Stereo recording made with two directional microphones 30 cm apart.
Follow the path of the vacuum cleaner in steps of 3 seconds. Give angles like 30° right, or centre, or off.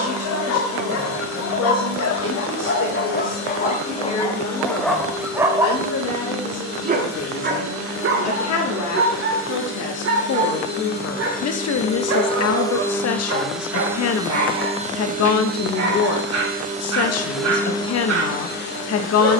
50° left, 50° left, 50° left, 40° left, centre, 20° right, 40° left.